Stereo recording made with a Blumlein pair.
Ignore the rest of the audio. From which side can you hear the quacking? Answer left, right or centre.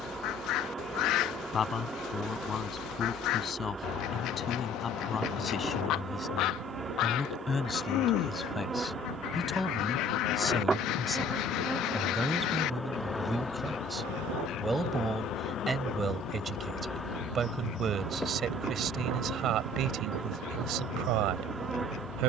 left.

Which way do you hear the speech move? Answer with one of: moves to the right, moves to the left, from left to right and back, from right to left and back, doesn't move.
moves to the right.